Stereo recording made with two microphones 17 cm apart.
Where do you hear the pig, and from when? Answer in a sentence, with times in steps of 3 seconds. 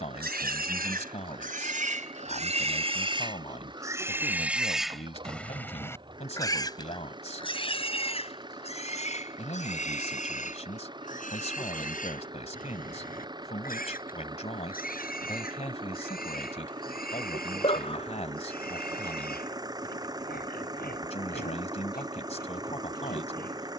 You can hear the pig on the right from 0 s, in the centre from 3 s and on the left from 6 s.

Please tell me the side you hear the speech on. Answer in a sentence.
You can hear the speech on the left.